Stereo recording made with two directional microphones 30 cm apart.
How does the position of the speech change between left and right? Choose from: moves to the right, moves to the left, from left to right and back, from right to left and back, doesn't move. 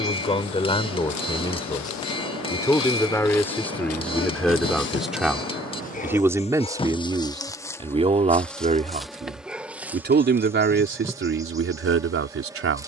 moves to the right.